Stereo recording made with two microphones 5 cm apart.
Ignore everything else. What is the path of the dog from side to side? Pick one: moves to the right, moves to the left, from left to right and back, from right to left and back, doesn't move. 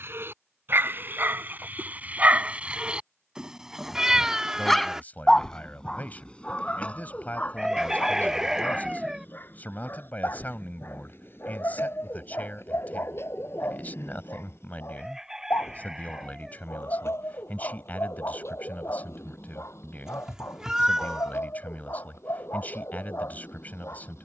moves to the left.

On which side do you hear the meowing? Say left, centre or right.
centre.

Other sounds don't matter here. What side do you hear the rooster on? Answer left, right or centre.
centre.